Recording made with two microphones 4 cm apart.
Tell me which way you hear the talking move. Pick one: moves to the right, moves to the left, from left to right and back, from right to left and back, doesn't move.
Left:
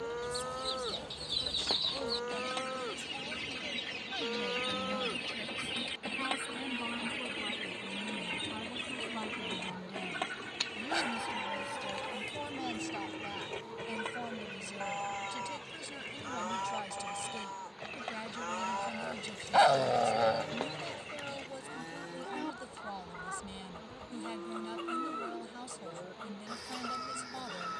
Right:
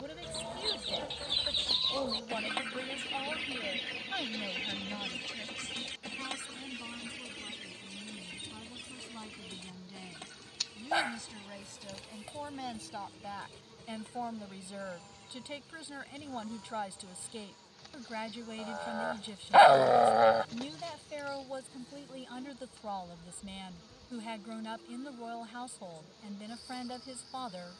from right to left and back.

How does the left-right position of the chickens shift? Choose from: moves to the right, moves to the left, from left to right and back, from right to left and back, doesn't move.
moves to the left.